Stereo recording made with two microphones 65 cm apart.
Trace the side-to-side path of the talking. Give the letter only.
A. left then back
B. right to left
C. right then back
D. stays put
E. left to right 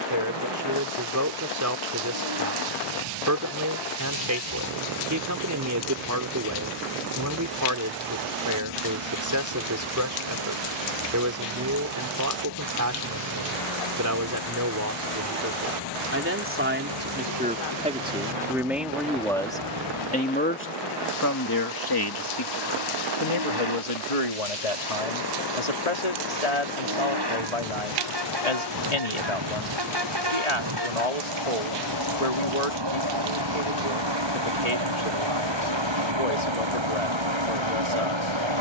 B.